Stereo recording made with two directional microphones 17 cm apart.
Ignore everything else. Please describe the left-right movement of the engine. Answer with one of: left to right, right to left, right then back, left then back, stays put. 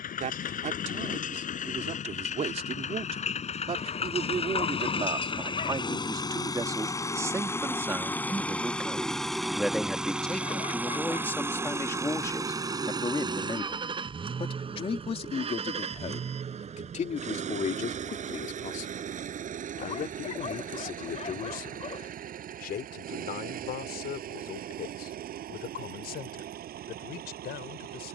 left to right.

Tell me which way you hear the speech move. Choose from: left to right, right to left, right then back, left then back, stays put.
right to left.